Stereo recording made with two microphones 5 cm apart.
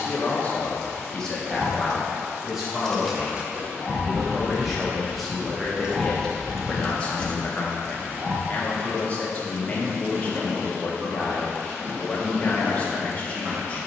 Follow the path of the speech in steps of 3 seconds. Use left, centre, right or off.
centre, centre, left, left, left.